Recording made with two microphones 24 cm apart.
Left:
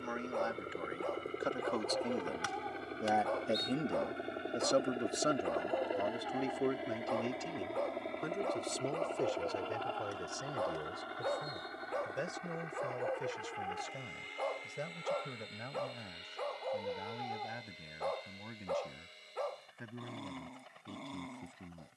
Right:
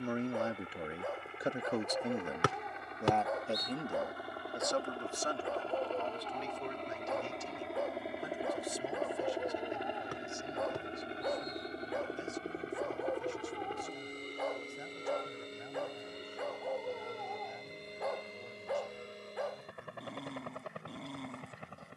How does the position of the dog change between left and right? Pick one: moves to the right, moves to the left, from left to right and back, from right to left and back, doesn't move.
doesn't move.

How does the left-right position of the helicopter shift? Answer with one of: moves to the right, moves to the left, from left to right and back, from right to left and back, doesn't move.
moves to the right.